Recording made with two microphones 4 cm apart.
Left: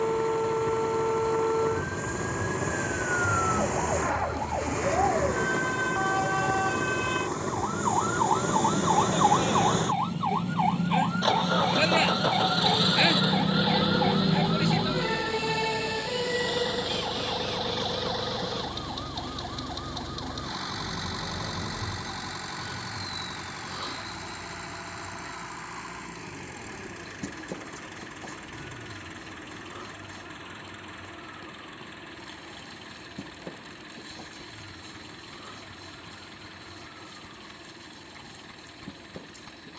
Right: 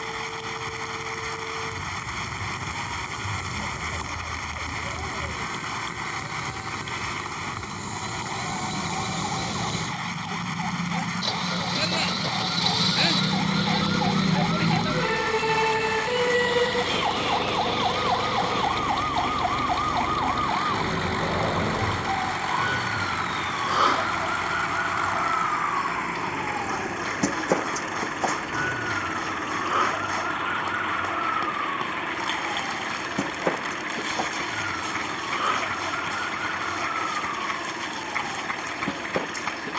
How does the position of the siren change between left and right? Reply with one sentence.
In this clip you hear the siren move to the right.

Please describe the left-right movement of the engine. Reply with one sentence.
In this clip you hear the engine move from left to right.